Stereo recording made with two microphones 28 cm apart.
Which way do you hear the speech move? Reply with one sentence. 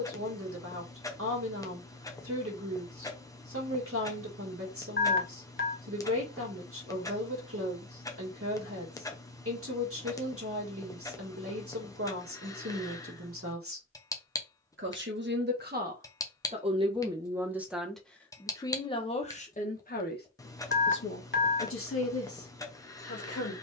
You can hear the speech move from right to left.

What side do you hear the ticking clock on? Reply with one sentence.
In this clip you hear the ticking clock in the centre.